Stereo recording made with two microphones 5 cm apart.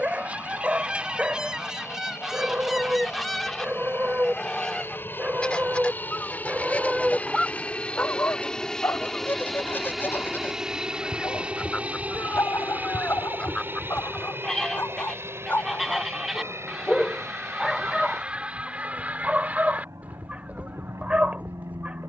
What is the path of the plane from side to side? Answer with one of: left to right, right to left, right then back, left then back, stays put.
left to right.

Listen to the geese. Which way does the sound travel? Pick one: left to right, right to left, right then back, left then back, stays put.
left then back.